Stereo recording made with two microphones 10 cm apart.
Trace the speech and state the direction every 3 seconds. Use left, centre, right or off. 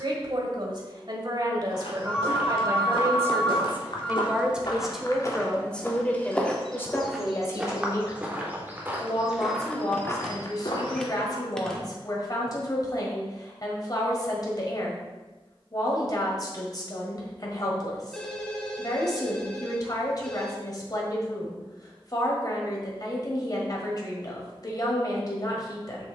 right, centre, left, left, left, left, left, left, left.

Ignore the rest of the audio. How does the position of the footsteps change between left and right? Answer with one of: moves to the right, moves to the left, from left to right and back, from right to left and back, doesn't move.
from left to right and back.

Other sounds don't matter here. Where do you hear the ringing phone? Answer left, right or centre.
centre.